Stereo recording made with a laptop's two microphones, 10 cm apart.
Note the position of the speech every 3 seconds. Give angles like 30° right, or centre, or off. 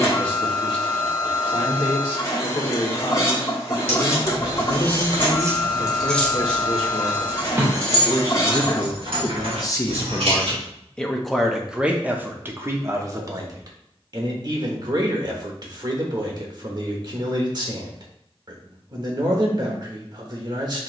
60° left, 60° left, 60° left, 20° left, 30° right, 40° right, 40° right.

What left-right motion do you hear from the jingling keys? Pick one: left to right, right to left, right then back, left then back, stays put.
left then back.